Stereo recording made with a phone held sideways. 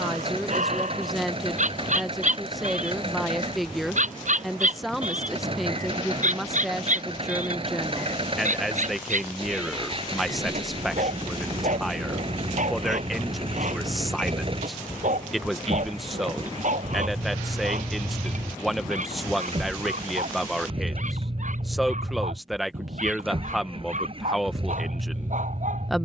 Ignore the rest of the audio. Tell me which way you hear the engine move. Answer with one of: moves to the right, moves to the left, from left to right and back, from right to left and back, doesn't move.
doesn't move.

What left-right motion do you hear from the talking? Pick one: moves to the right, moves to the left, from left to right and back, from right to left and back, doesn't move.
doesn't move.